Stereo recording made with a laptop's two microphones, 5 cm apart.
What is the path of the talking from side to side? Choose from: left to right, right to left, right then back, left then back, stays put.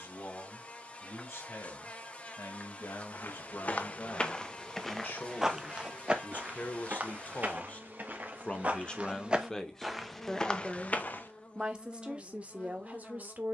left to right.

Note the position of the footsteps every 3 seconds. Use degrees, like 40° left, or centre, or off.
off, 10° left, 30° right, 10° left, off.